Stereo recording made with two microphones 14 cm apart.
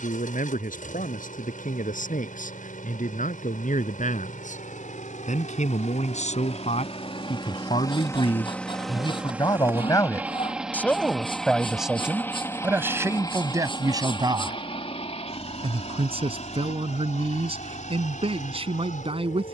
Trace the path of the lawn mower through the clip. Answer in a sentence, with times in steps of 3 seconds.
In this clip you hear the lawn mower on the left from 0 s, in the centre from 9 s and on the left from 12 s.